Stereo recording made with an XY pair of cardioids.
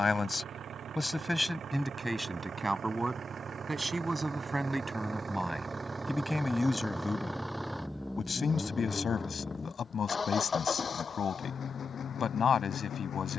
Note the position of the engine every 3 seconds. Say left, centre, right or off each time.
right, right, centre, left, left.